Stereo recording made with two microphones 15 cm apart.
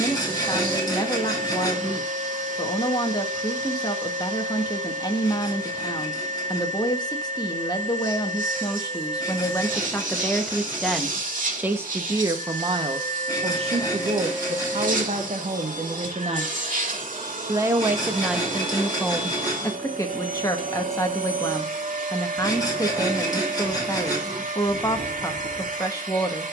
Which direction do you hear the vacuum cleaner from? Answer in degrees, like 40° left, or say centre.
60° right.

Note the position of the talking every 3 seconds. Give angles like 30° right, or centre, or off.
30° left, 30° left, 30° left, 10° left, 40° right, 40° right, 10° left, 20° left, 20° left.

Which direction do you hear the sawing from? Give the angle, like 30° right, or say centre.
30° left.